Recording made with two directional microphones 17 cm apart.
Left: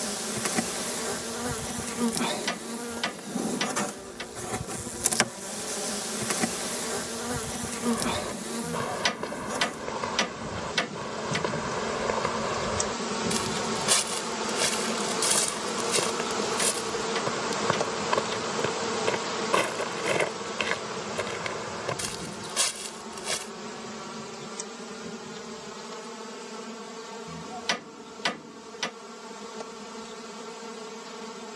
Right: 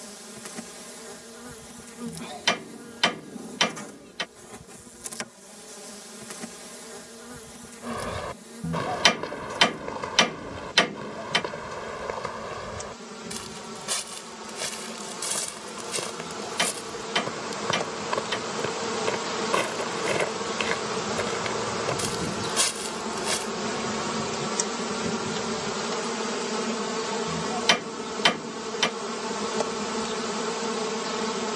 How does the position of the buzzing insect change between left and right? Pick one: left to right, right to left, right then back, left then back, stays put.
left to right.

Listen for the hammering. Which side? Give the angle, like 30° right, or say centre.
40° right.